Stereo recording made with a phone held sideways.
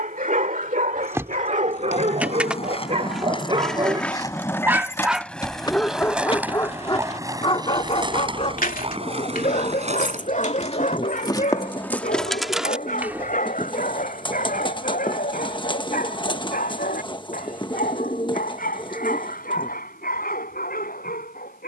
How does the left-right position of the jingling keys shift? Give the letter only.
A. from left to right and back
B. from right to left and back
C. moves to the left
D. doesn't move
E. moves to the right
B.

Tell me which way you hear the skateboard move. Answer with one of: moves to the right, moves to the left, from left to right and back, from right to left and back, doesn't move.
moves to the right.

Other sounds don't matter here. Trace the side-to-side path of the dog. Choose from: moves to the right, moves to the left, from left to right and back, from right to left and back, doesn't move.
moves to the left.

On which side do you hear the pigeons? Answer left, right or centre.
left.